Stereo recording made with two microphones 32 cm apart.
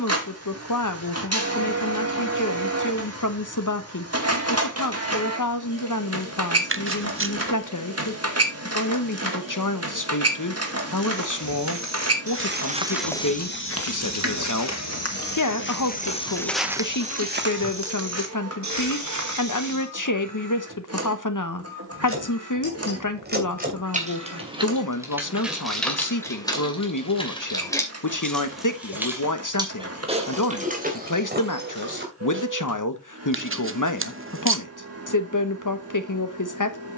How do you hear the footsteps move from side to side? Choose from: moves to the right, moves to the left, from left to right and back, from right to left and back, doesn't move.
from right to left and back.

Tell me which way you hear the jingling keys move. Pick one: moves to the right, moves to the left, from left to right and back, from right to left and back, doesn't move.
from right to left and back.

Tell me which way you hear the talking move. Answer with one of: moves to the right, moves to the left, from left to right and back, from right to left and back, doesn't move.
doesn't move.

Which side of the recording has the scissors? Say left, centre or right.
right.